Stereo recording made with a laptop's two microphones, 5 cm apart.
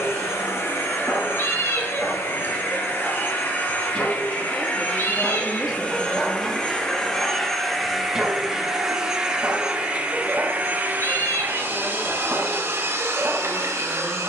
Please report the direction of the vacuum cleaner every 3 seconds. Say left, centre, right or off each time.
left, left, centre, right, right.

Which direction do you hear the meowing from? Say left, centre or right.
left.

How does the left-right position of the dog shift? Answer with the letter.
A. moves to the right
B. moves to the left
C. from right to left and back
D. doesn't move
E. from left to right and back
A.